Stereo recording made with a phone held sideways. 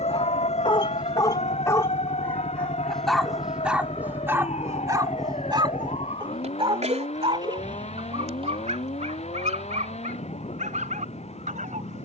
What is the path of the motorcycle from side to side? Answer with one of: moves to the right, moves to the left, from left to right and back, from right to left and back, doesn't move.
moves to the right.